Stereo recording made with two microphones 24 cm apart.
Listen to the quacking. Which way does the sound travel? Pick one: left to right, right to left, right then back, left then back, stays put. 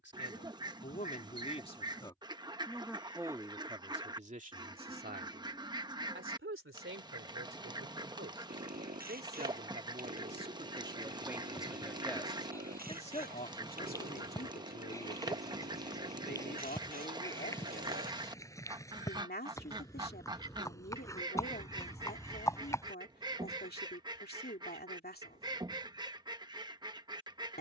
stays put.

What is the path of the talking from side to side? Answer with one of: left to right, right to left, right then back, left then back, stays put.
right then back.